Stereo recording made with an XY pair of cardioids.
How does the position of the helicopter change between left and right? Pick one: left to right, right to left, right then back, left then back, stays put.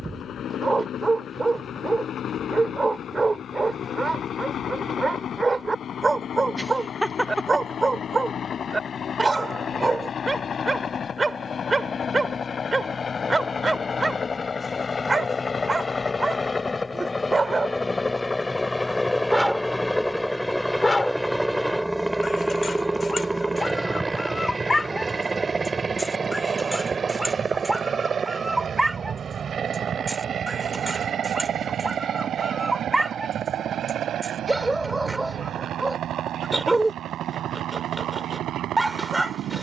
left to right.